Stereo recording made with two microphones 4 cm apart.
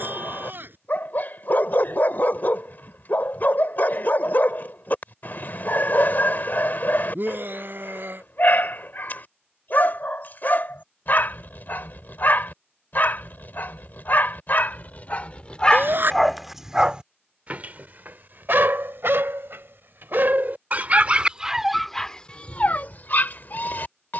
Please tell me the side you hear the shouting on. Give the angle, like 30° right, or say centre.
50° right.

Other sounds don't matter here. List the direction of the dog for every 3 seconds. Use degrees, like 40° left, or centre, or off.
50° left, 50° left, 50° left, 50° left, 50° left, centre, 60° right, 20° left.